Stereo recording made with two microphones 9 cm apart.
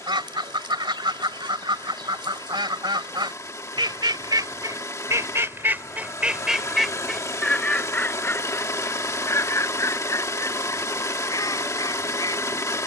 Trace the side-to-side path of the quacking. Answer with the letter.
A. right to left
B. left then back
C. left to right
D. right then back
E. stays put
A.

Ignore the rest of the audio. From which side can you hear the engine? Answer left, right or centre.
left.